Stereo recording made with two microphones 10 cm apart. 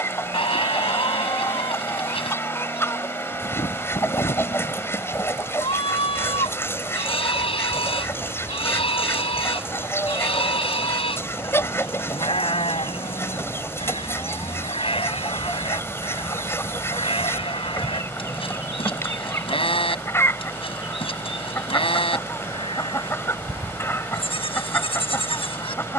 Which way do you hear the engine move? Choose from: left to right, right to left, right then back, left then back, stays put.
stays put.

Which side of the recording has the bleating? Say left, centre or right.
left.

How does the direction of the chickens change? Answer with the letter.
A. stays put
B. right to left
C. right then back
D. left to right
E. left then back
A.